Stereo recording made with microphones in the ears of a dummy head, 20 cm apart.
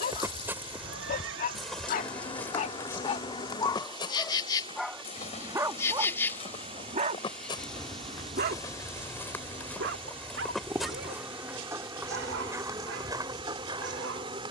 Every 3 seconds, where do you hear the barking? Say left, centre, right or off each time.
left, centre, right, right, right.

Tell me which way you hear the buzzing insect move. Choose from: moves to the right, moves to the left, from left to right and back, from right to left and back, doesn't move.
moves to the right.